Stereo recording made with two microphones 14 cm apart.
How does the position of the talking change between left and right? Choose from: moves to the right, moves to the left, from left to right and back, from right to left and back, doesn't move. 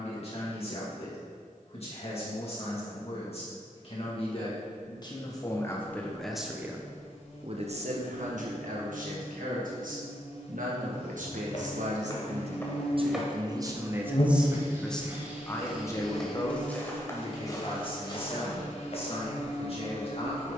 from left to right and back.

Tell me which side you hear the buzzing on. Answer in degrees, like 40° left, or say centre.
50° left.